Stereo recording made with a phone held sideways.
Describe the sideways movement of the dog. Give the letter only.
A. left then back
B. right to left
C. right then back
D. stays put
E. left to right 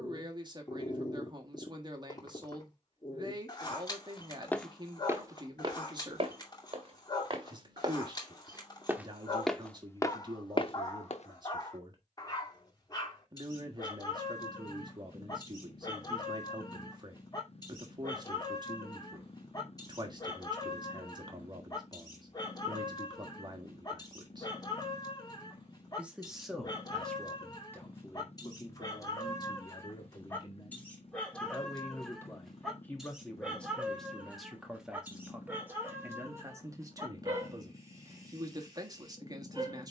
E.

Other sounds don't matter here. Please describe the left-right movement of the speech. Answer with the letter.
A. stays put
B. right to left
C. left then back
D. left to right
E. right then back
C.